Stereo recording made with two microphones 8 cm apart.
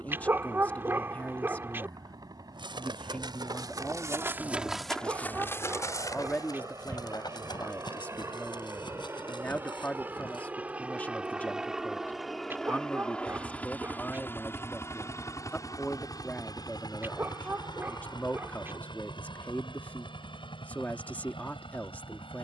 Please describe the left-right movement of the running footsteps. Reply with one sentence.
You can hear the running footsteps go from the right side to the left.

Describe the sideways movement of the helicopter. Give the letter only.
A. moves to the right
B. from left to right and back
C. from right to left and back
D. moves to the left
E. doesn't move
D.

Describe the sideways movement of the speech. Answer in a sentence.
In this clip you hear the speech stay put.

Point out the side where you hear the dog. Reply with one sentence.
You can hear the dog on the right.